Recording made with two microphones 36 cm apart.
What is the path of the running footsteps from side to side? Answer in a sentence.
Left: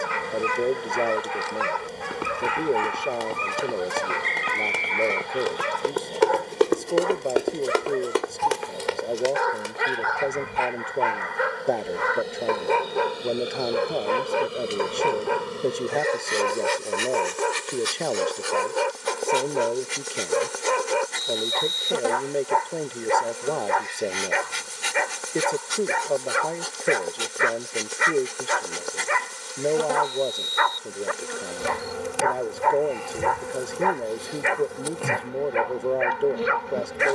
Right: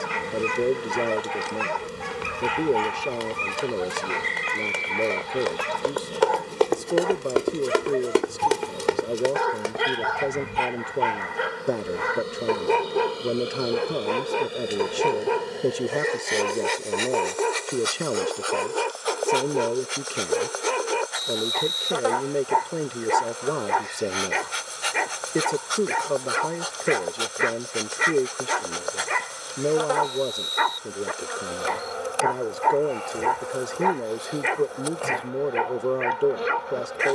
You can hear the running footsteps move to the right.